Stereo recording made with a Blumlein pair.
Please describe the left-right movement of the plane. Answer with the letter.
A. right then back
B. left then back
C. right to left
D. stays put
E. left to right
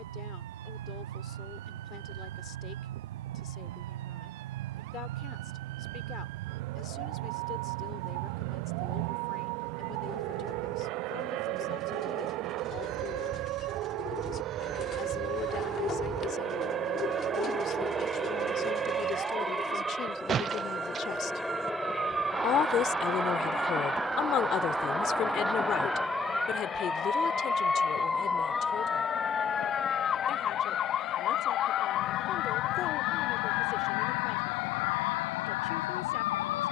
C.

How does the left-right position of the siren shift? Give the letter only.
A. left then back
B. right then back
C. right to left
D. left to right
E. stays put
C.